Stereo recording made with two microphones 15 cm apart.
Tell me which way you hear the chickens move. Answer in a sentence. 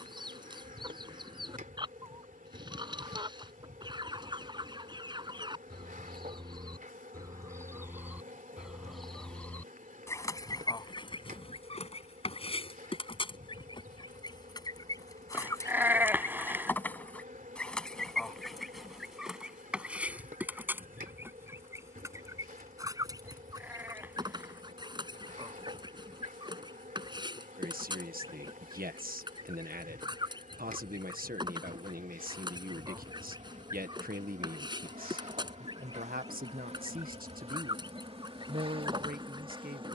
You can hear the chickens go left and come back.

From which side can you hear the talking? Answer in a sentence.
In this clip you hear the talking on the right.